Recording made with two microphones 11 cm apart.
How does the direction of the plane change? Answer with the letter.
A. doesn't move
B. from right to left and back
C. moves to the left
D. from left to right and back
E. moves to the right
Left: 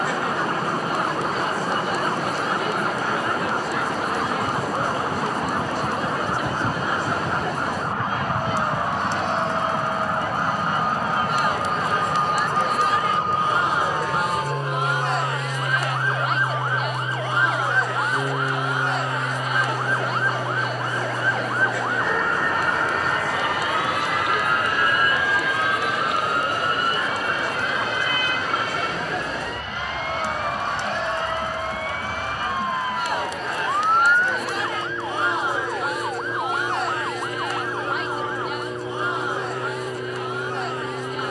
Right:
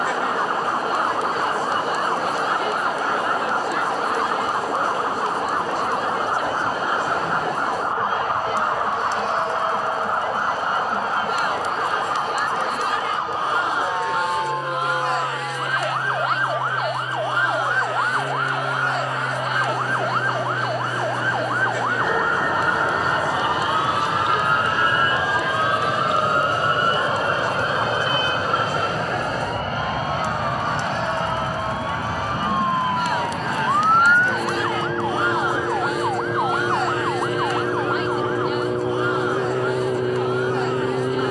E.